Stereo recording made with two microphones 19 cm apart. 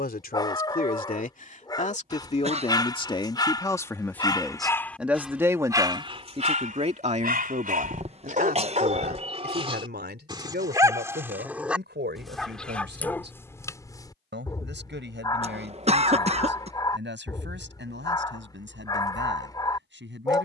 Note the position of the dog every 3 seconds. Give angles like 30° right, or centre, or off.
20° left, 10° left, 40° right, 20° right, 10° left, 20° left, 20° left.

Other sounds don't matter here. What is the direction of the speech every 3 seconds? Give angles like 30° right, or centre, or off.
40° left, centre, 40° right, 60° right, 70° right, 80° right, 80° right.